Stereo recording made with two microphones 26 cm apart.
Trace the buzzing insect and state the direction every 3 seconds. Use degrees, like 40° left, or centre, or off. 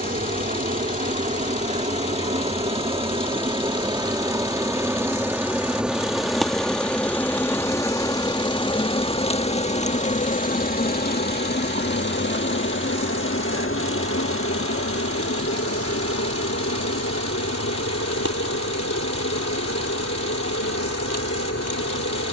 30° right, 10° right, 10° left, 30° left, 50° left, 60° left, 70° left, 70° left.